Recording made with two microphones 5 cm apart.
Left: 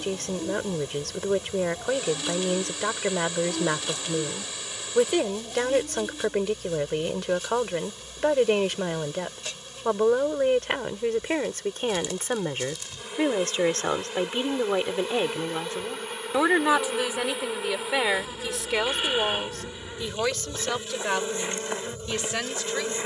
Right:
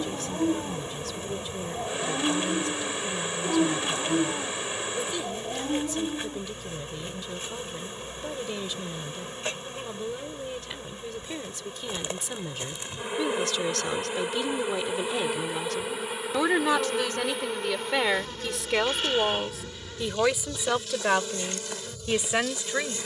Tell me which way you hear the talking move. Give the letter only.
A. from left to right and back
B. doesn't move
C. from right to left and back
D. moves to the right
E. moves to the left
D.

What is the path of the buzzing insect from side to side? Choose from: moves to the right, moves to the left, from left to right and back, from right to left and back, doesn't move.
moves to the left.